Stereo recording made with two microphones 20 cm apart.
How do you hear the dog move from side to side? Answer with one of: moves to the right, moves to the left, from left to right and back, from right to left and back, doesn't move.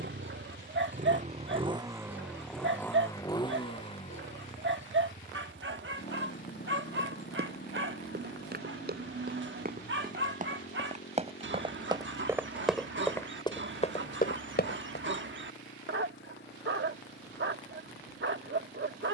doesn't move.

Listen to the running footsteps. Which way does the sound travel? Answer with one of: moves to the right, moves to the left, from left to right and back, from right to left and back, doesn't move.
moves to the left.